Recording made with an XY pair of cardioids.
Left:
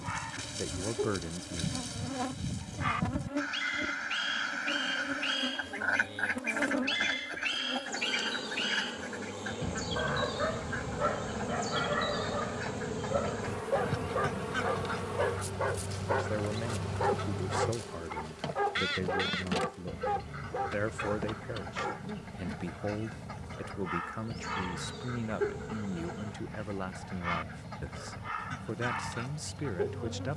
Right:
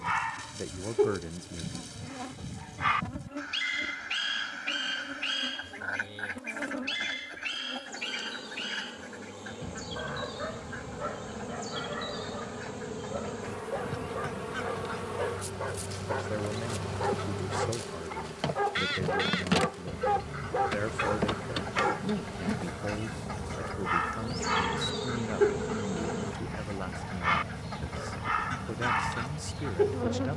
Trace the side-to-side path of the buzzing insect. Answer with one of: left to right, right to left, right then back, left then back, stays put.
left to right.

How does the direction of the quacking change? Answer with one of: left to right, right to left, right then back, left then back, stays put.
left to right.